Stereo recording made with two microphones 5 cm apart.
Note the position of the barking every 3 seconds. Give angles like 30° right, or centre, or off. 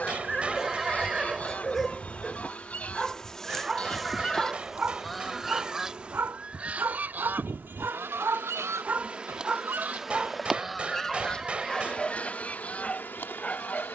10° left, 20° right, 40° right, 10° right, 20° left.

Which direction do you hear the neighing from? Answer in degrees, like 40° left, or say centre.
10° right.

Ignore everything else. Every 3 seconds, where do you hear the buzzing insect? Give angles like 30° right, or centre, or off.
30° left, centre, 30° right, centre, 30° left.